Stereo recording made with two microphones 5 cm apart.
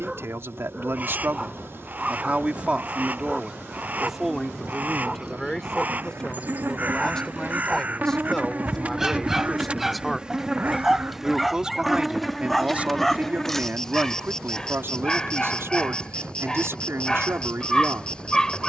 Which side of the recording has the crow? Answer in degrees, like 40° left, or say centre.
30° right.